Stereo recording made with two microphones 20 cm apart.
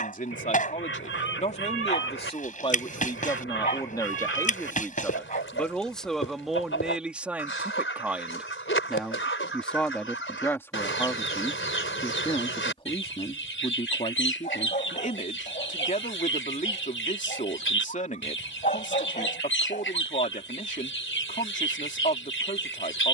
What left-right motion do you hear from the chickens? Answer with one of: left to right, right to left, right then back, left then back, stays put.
stays put.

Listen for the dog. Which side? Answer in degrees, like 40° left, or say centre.
40° left.